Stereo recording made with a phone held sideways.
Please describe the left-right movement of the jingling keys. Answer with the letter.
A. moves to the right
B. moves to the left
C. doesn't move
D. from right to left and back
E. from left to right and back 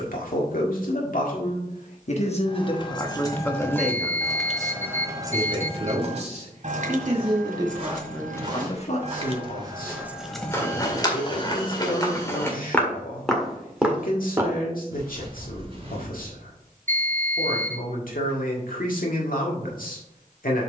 E.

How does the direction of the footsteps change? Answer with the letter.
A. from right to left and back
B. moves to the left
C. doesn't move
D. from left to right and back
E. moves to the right
A.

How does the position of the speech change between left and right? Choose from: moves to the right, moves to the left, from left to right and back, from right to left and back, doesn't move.
from left to right and back.